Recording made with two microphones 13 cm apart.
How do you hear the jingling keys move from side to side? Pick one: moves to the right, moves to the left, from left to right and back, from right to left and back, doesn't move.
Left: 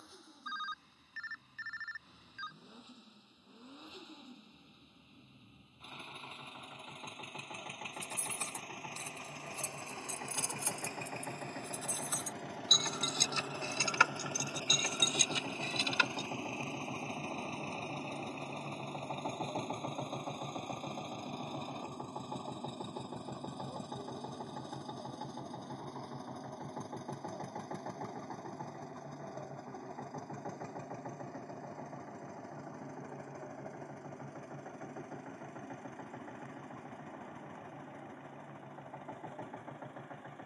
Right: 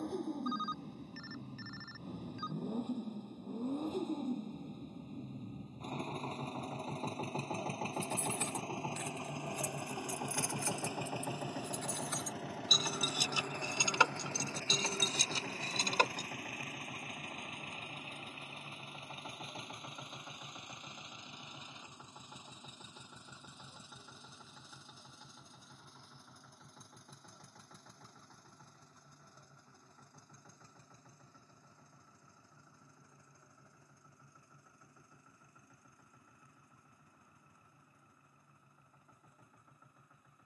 moves to the right.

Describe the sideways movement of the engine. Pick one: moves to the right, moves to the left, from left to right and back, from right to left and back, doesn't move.
moves to the left.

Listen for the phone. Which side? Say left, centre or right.
right.